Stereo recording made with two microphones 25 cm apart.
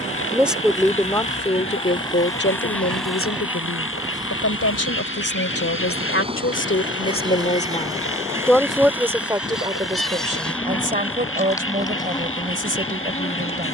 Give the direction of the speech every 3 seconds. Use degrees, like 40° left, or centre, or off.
30° left, 70° left, 30° left, 30° right, 30° right.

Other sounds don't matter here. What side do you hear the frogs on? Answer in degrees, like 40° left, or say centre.
60° left.